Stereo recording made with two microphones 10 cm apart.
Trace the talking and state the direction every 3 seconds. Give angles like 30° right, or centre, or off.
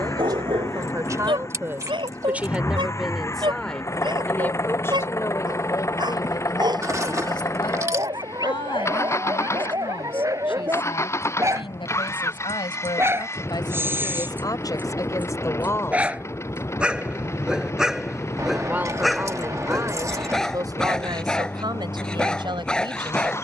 30° right, 20° left, 50° left, 60° left, 50° left, 30° left, 30° right, 50° right.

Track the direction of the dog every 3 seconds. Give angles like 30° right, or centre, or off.
60° right, 50° right, 40° right, 40° right, 20° right, 10° right, centre, 10° left.